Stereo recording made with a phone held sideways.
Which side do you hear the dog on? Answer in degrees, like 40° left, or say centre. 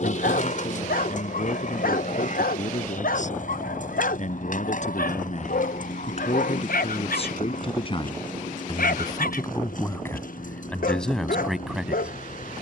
80° left.